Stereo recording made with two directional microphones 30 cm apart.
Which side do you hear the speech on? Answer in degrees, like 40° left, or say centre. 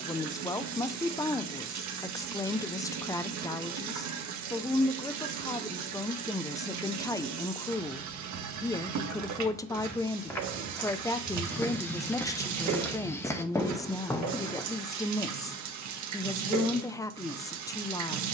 10° left.